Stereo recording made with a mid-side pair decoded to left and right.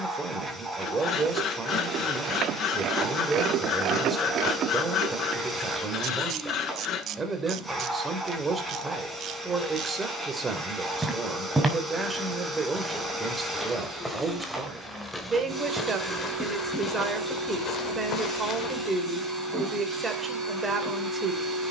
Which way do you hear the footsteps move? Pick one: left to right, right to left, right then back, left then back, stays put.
right to left.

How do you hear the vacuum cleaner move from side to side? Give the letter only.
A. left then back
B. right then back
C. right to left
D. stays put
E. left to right
D.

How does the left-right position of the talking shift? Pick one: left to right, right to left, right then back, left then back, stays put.
stays put.